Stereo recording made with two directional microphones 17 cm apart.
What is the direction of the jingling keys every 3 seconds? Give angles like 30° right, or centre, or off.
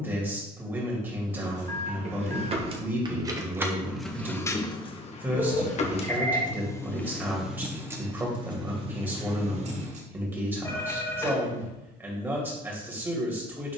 40° right, 10° left, centre, 40° right, off.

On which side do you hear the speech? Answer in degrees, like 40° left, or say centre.
10° right.